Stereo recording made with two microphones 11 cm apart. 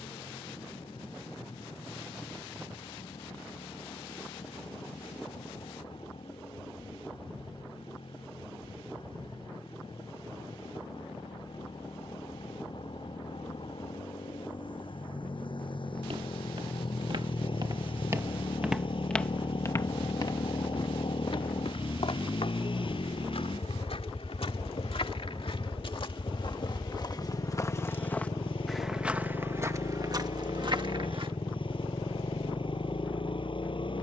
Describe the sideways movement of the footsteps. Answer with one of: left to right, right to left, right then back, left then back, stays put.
left then back.